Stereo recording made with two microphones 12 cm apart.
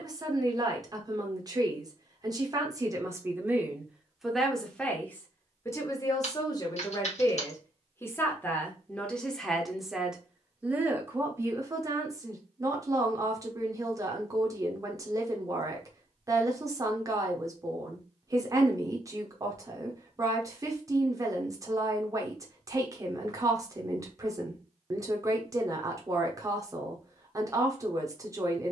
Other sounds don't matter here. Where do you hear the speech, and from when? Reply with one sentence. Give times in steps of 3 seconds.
You can hear the speech on the right from 0 s, in the centre from 3 s, on the left from 6 s, in the centre from 9 s and on the right from 12 s.